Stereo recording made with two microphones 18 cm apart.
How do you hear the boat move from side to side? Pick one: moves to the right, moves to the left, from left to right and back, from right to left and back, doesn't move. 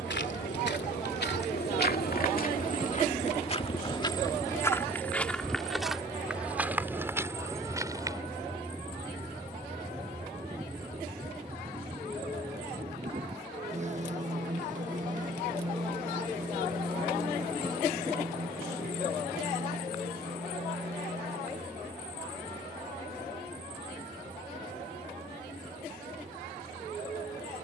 moves to the right.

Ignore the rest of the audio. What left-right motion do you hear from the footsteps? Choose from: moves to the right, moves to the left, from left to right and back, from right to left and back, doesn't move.
moves to the right.